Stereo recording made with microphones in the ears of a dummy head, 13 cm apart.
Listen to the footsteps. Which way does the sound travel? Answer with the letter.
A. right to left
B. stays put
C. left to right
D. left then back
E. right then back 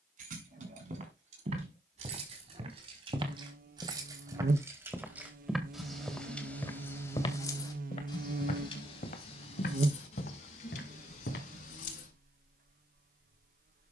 A.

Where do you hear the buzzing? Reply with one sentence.
You can hear the buzzing on the right.